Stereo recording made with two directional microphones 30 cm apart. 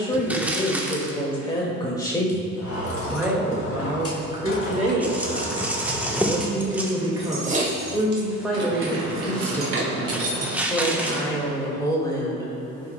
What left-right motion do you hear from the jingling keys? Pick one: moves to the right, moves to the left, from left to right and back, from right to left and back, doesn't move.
moves to the right.